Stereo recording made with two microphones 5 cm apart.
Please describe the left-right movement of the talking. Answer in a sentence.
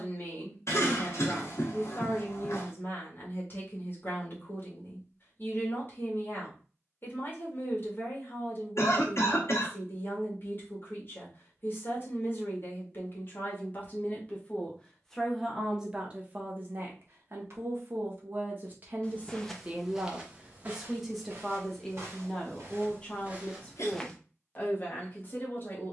In this clip you hear the talking move from left to right and back again.